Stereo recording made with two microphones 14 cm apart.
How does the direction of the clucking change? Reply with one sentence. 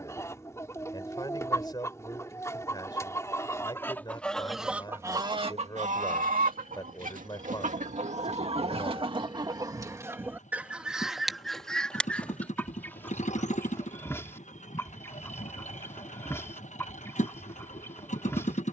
You can hear the clucking move from left to right and back again.